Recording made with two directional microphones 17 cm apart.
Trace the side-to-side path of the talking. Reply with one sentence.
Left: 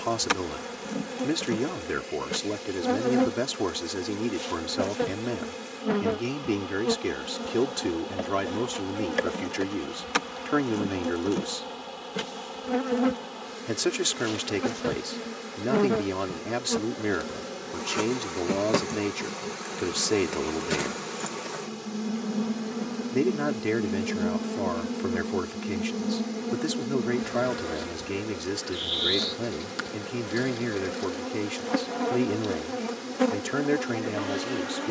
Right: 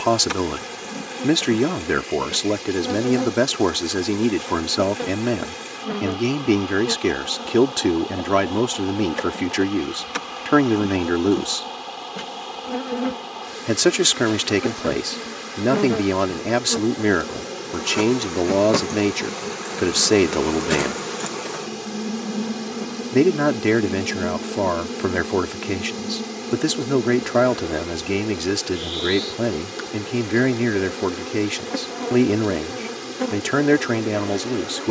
In this clip you hear the talking stay in one place.